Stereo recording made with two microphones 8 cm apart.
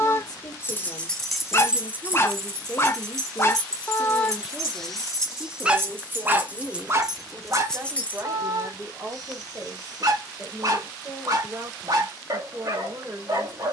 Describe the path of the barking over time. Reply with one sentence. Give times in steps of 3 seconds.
You can hear the barking on the left from 0 s, in the centre from 3 s and on the right from 6 s.